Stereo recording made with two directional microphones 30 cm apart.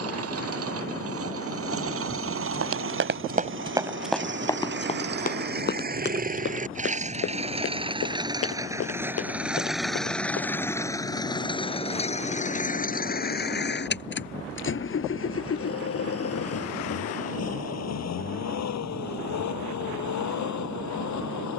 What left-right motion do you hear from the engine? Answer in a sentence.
In this clip you hear the engine travel towards the left.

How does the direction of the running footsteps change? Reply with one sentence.
You can hear the running footsteps go from the right side to the left.